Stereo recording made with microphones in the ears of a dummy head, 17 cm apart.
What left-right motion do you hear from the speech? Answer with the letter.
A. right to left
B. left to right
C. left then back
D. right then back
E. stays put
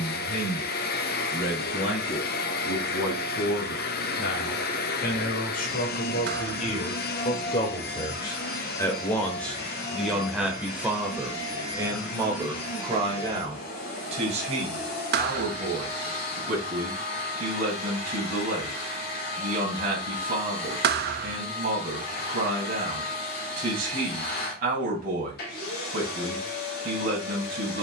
B.